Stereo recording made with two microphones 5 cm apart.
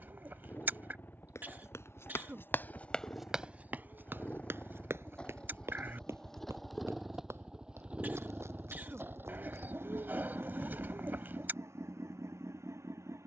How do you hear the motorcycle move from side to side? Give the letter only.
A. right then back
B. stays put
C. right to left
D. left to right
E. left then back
D.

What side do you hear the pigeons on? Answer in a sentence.
In this clip you hear the pigeons on the right.